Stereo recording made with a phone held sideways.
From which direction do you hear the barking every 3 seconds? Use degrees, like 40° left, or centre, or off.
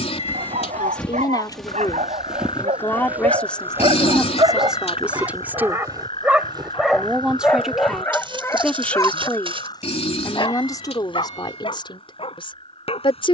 60° right, 40° right, 10° left, 40° left, 50° left.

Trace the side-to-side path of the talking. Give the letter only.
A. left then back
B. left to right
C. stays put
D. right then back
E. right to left
D.